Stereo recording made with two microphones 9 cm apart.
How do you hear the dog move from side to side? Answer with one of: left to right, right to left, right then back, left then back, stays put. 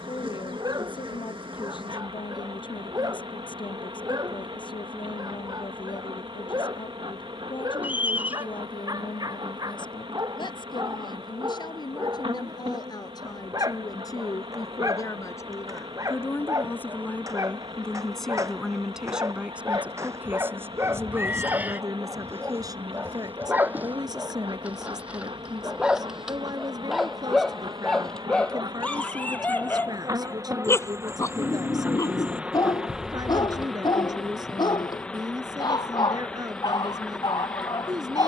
right to left.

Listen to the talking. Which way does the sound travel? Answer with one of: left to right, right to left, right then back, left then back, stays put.
left to right.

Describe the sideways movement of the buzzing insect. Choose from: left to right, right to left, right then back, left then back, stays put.
right to left.